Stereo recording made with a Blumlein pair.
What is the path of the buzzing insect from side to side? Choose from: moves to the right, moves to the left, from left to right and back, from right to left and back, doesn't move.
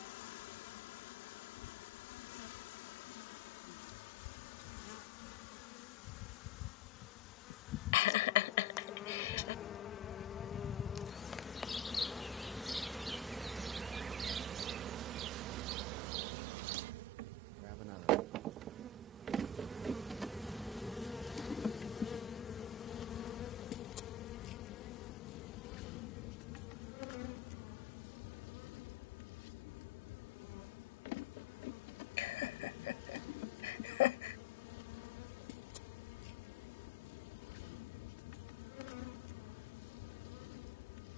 from left to right and back.